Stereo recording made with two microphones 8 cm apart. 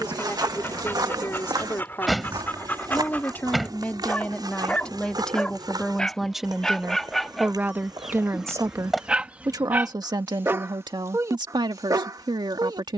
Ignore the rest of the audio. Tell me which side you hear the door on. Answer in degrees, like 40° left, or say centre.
centre.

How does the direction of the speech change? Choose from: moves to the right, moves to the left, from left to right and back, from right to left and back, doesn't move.
moves to the right.